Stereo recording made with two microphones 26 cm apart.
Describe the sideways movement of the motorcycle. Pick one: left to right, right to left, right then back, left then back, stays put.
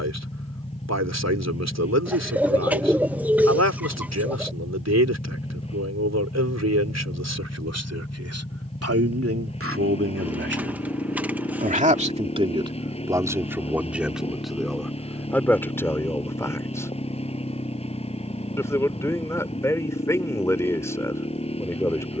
stays put.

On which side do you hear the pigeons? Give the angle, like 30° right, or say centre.
10° right.